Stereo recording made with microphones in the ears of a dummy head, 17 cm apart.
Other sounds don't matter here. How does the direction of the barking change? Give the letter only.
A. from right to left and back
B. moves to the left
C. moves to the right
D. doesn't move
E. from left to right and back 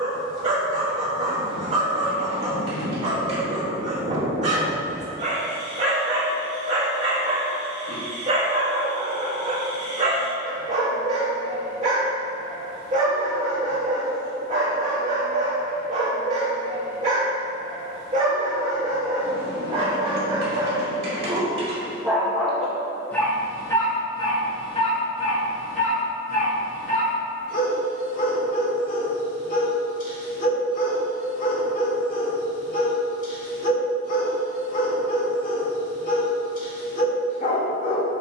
B.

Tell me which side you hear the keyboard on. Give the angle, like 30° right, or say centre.
50° right.